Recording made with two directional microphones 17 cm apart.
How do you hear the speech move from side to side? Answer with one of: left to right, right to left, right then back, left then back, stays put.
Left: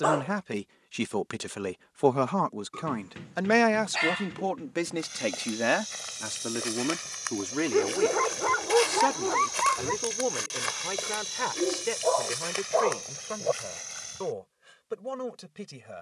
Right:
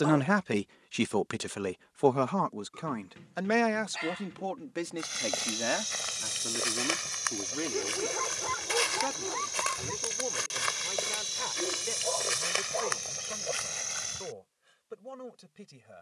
right to left.